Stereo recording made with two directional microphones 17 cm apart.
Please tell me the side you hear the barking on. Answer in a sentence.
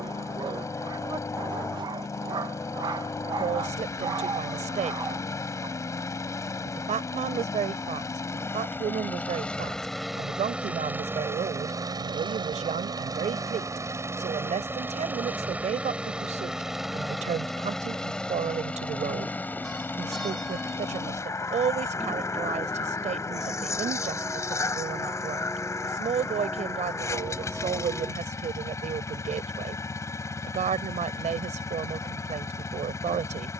You can hear the barking on the right.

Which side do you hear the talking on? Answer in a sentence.
In this clip you hear the talking on the right.